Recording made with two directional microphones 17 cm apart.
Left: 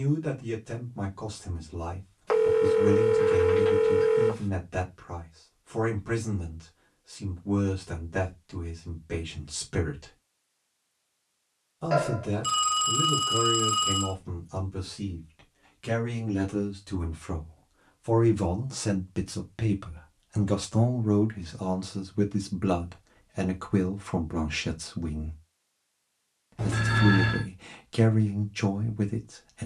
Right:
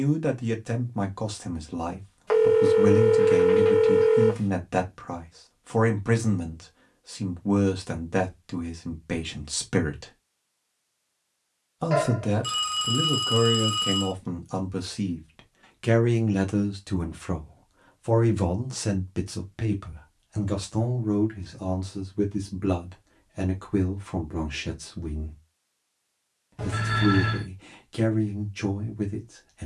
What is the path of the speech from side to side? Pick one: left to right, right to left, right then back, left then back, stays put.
right to left.